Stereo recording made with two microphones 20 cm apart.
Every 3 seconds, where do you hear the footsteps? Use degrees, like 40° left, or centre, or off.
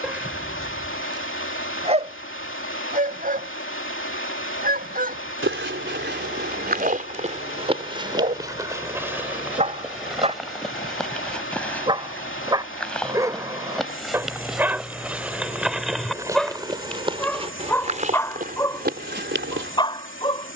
off, 70° right, 30° right, centre, centre, 20° right, 50° right.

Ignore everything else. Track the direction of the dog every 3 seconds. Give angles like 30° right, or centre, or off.
20° right, 40° right, 40° right, 30° right, 10° right, centre, 20° left.